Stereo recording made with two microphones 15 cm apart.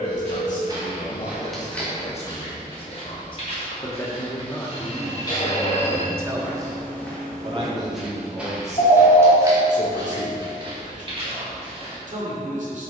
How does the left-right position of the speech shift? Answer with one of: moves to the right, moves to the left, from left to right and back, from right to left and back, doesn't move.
moves to the right.